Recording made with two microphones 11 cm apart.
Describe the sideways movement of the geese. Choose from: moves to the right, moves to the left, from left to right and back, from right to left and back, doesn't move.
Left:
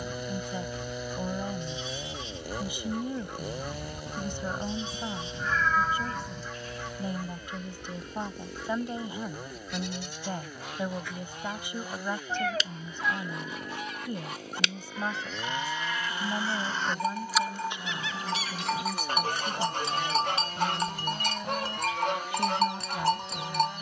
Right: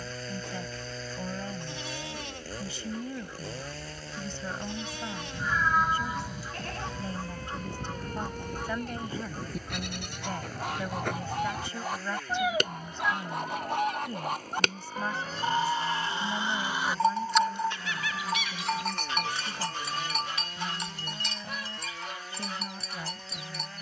from left to right and back.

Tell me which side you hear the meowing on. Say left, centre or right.
centre.